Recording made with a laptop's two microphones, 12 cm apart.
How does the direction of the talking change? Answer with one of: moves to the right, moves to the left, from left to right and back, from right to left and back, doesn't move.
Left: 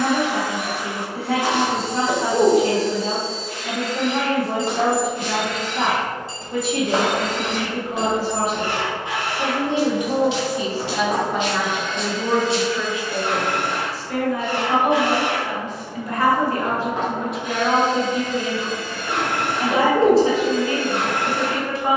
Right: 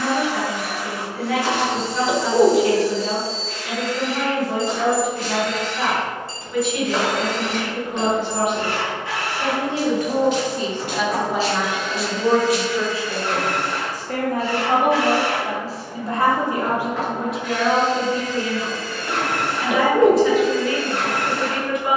from left to right and back.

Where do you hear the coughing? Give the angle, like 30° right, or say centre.
10° right.